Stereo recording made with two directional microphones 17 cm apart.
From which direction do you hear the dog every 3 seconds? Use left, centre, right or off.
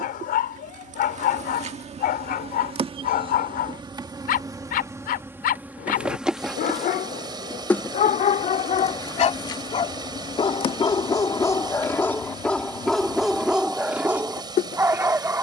left, left, left, left, centre.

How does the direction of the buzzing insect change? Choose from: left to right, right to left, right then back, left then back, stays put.
right to left.